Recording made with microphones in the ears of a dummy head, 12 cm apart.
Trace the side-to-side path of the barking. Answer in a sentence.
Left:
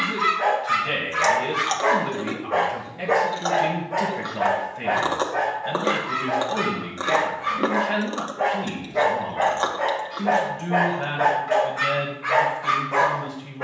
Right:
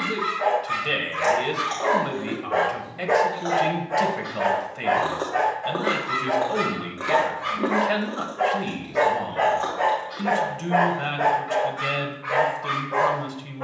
In this clip you hear the barking move from left to right and back again.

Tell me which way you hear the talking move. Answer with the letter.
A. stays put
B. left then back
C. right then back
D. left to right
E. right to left
A.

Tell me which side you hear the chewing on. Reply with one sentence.
You can hear the chewing on the left.